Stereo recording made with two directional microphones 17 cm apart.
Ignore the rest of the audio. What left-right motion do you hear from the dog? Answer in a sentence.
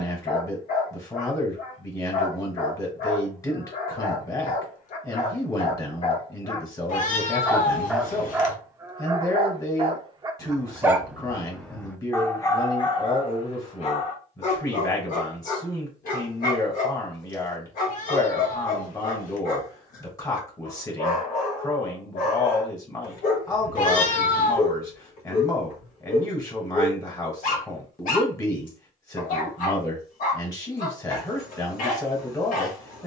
In this clip you hear the dog move from left to right and back again.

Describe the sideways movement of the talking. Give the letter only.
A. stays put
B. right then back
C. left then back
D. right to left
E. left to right
A.